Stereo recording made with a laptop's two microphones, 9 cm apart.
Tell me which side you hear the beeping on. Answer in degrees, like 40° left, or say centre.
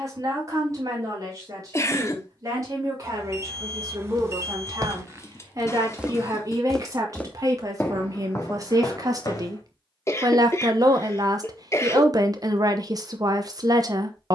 30° right.